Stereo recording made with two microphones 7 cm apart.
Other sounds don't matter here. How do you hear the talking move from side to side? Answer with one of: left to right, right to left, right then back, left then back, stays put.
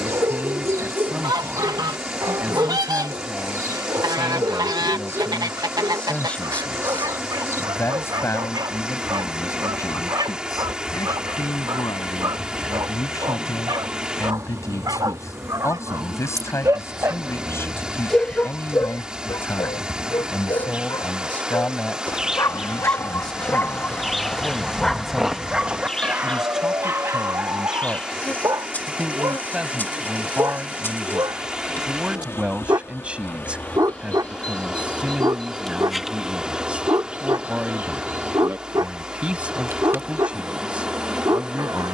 left then back.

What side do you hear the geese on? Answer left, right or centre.
right.